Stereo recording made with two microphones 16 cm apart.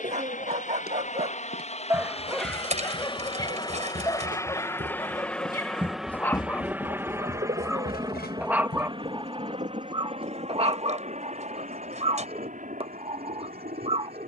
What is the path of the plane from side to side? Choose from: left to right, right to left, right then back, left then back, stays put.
left to right.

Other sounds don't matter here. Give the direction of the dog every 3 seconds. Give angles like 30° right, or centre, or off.
20° right, 20° left, centre, 30° right, 40° right.